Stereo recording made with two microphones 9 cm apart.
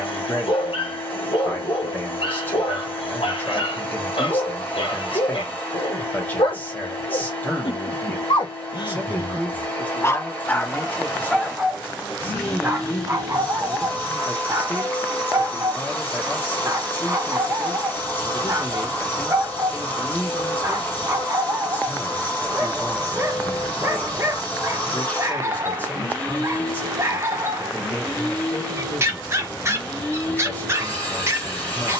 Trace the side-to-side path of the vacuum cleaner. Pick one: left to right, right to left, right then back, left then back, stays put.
stays put.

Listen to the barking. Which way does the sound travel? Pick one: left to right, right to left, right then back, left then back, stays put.
left to right.